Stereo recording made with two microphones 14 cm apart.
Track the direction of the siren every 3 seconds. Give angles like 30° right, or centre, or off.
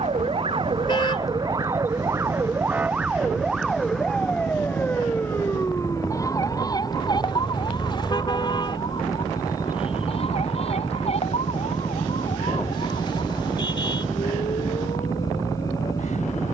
30° right, 10° left, 30° left, 40° left, 50° left, 50° left.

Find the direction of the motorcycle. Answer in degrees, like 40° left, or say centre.
20° left.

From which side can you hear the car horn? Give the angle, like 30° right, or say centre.
30° left.